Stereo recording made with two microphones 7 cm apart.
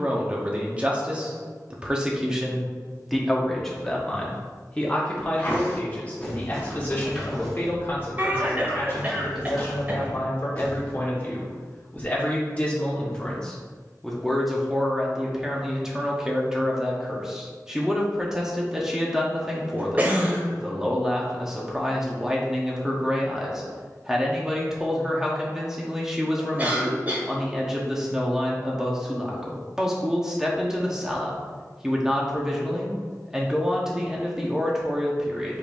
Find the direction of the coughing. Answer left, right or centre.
right.